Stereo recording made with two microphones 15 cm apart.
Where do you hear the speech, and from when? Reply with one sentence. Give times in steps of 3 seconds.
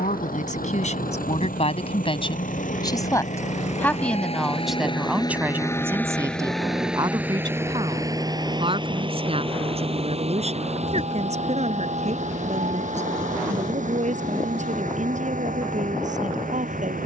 You can hear the speech on the left from 0 s, in the centre from 3 s and on the right from 6 s.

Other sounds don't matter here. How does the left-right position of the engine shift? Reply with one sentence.
In this clip you hear the engine move to the right.